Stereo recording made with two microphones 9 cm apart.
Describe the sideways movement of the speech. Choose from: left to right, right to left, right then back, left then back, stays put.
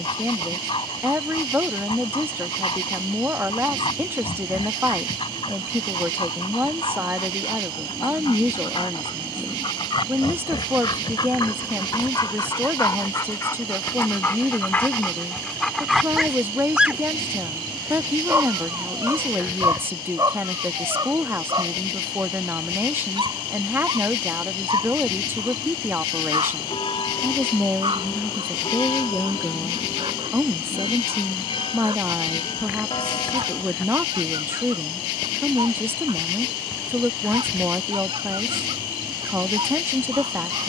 stays put.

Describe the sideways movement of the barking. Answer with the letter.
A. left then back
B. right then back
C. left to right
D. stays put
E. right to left
C.